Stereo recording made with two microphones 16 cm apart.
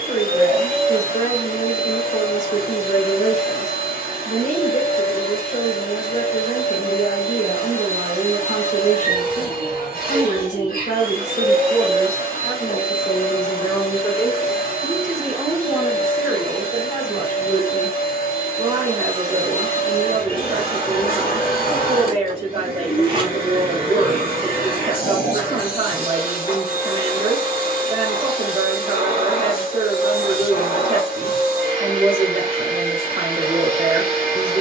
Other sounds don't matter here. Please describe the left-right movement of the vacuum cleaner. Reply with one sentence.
In this clip you hear the vacuum cleaner stay put.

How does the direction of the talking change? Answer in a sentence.
In this clip you hear the talking travel towards the right.